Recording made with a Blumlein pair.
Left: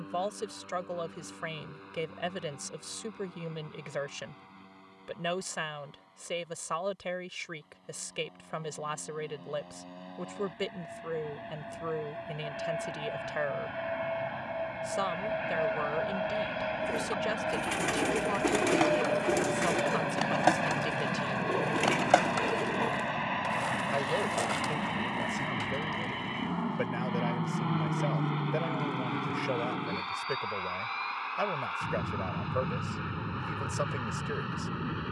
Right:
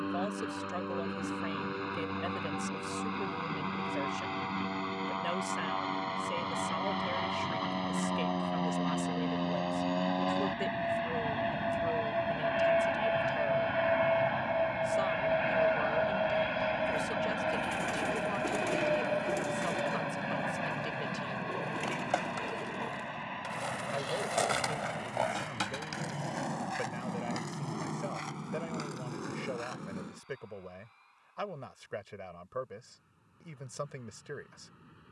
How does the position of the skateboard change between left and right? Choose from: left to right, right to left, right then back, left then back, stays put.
left to right.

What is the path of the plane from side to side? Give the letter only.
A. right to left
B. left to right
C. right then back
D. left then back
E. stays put
A.